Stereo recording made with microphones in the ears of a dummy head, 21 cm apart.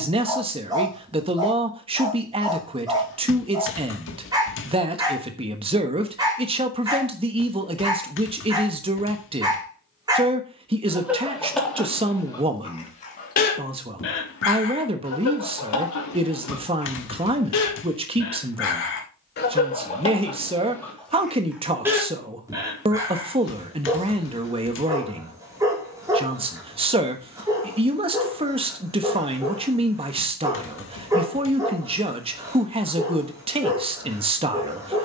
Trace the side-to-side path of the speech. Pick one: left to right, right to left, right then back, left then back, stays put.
stays put.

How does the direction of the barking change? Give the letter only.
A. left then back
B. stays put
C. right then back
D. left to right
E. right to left
A.